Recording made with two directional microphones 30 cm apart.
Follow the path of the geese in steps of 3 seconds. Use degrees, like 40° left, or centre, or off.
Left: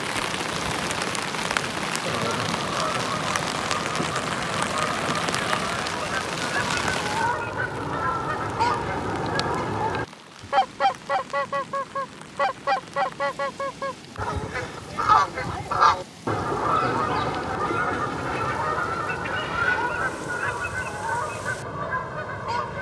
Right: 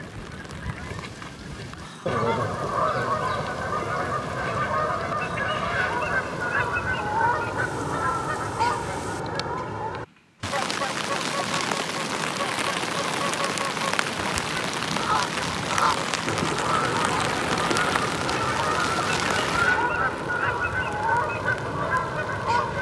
30° right, 30° right, 10° right, 40° left, 50° left, 20° left, 10° right, 20° right.